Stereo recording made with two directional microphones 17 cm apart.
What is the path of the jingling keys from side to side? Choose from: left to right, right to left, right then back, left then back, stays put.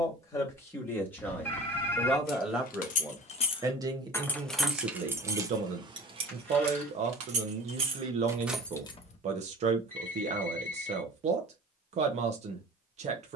right then back.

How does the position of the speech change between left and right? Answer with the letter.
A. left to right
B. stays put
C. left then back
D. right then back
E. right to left
A.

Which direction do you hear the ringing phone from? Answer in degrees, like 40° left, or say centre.
10° left.